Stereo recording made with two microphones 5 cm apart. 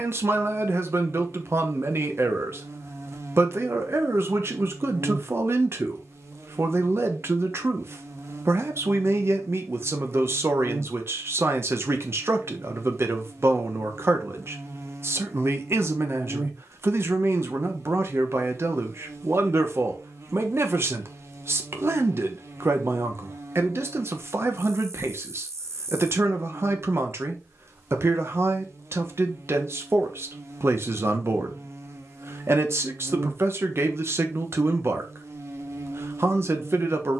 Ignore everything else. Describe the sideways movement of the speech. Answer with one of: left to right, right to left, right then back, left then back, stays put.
stays put.